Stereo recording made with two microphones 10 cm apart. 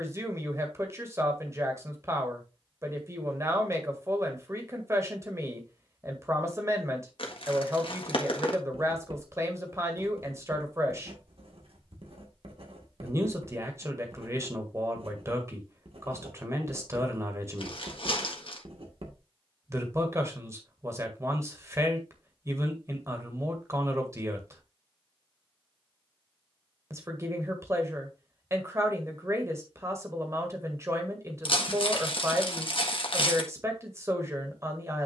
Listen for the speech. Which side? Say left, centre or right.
right.